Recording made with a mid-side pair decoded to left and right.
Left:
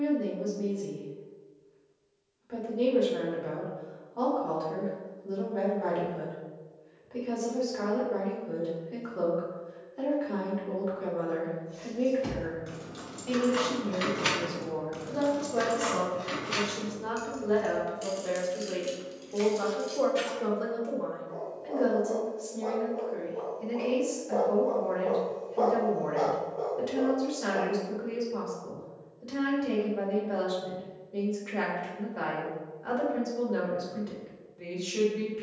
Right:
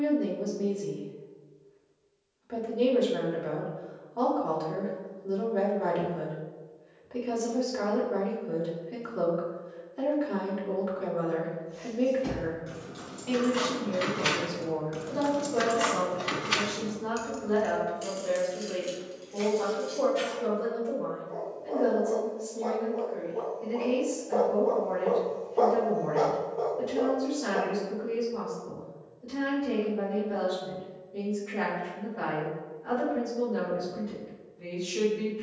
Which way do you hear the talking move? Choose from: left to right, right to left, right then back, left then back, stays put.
right to left.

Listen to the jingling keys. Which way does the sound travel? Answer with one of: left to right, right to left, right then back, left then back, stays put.
right then back.